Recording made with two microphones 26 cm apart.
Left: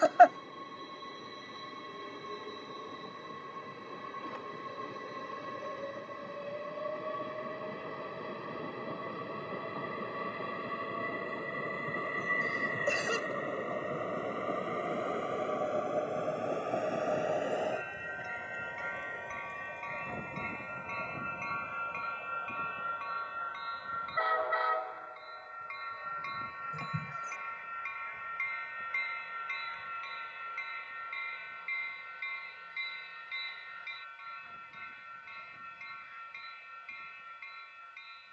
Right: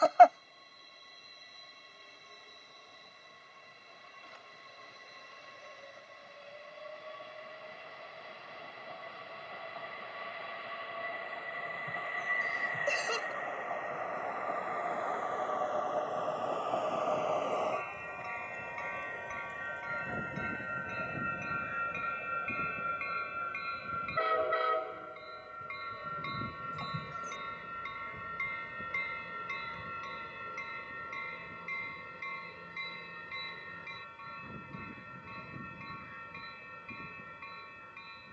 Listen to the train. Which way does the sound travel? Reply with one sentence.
You can hear the train move from left to right.